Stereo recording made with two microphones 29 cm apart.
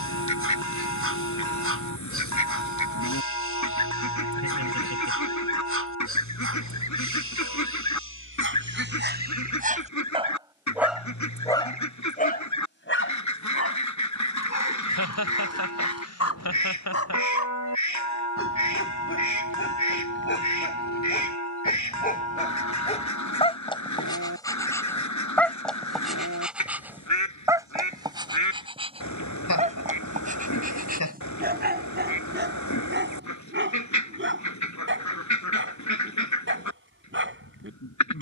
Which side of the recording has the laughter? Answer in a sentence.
In this clip you hear the laughter on the left.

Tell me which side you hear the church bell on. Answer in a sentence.
You can hear the church bell on the left.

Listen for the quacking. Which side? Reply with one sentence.
In this clip you hear the quacking on the left.